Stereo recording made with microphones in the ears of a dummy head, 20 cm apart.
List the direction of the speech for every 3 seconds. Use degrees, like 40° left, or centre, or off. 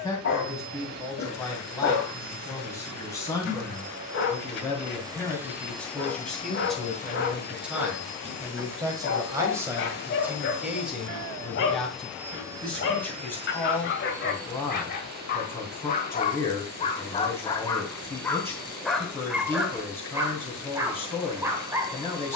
10° left, 10° left, centre, 10° right, 10° left, 10° left, 10° left, 10° left.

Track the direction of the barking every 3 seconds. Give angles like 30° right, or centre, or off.
60° left, 60° left, 60° left, 60° left, 50° left, 30° left, centre, 10° right.